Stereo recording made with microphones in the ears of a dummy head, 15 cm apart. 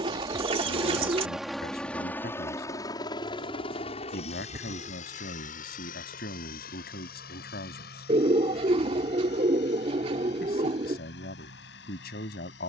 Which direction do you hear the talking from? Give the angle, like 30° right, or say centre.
60° left.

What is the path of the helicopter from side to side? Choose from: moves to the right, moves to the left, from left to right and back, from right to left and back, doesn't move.
moves to the left.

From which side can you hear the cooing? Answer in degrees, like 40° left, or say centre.
30° right.